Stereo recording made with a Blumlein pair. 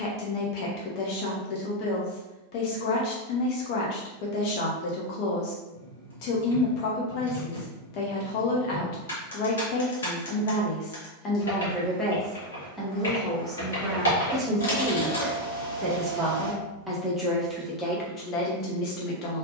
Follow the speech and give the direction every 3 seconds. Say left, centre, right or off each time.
left, left, left, left, centre, centre, left.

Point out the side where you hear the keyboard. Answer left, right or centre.
left.